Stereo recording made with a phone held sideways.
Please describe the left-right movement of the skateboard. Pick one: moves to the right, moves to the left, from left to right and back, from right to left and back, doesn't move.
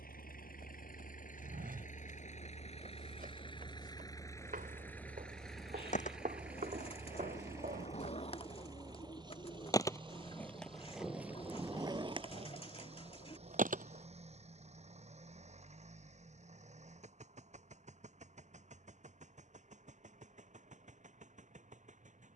moves to the right.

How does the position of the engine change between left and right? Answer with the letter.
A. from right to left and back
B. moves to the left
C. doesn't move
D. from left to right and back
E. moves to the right
E.